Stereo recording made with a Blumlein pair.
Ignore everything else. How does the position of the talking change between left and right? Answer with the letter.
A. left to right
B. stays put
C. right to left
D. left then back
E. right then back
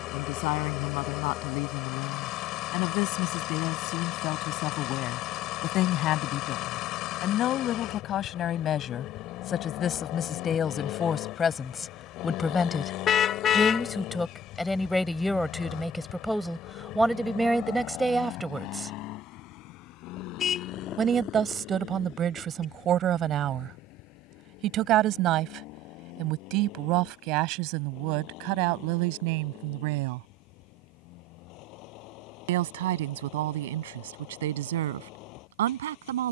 A.